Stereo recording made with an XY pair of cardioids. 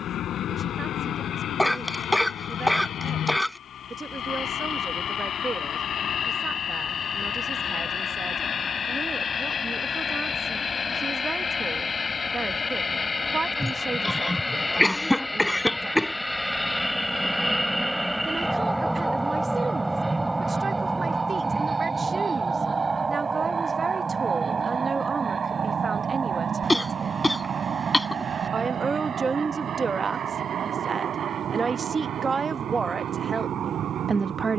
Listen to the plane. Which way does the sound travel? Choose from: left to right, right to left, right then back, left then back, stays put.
left to right.